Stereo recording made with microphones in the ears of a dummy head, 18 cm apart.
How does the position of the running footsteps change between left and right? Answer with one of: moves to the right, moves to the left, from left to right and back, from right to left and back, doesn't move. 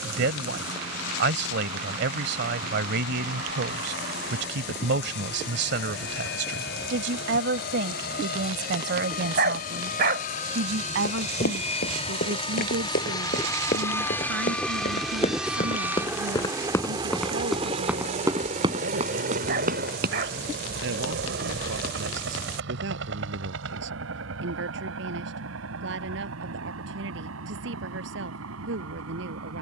moves to the right.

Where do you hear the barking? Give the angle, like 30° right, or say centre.
50° right.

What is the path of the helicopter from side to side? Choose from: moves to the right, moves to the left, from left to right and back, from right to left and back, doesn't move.
moves to the right.